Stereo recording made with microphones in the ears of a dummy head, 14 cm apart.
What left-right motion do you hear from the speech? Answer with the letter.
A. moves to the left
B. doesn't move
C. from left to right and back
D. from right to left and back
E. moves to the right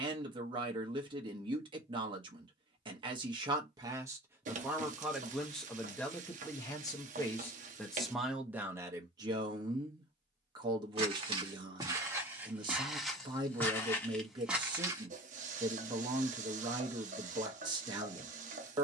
D.